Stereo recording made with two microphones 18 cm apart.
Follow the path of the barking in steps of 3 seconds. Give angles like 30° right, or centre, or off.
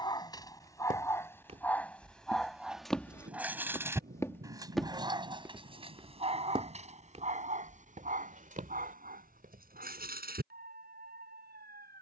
10° left, 20° right, 40° right, 60° right.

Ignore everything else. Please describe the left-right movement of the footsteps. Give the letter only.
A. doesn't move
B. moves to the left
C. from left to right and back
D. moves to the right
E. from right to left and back
E.